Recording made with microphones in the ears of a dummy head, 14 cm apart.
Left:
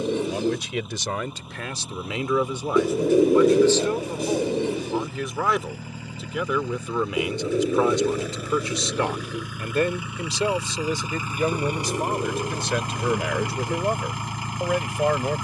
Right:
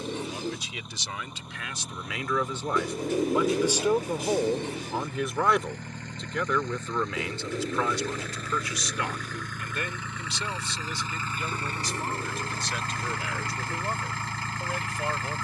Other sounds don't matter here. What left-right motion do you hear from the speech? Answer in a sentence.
You can hear the speech move from left to right and back again.